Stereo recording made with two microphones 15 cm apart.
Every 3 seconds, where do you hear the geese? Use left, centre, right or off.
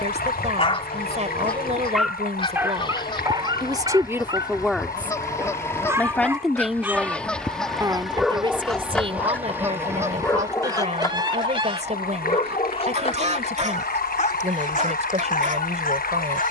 left, left, centre, right, right, right.